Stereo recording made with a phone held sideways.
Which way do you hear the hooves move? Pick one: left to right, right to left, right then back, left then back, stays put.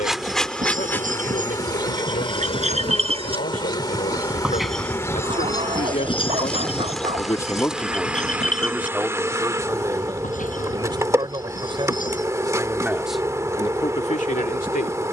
right to left.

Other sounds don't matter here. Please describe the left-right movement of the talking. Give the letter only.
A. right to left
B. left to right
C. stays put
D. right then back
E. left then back
D.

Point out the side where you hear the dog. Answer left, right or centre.
right.